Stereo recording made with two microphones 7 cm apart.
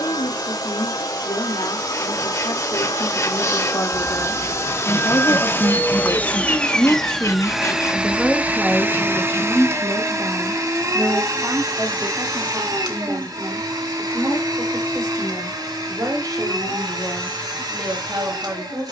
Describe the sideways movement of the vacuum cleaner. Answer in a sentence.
You can hear the vacuum cleaner move from left to right.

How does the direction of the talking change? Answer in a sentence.
In this clip you hear the talking move to the right.